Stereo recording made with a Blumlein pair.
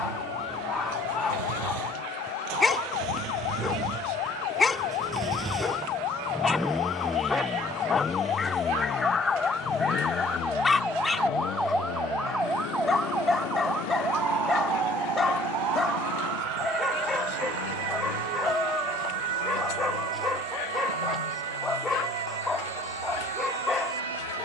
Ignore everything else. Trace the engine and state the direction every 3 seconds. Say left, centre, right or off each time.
right, right, centre, left, left, left, left, left.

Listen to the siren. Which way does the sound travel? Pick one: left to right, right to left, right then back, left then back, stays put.
left to right.